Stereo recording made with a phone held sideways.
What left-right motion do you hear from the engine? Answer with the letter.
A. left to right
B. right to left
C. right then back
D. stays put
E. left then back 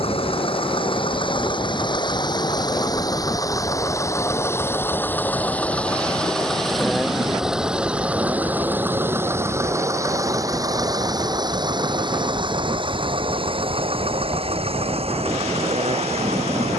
A.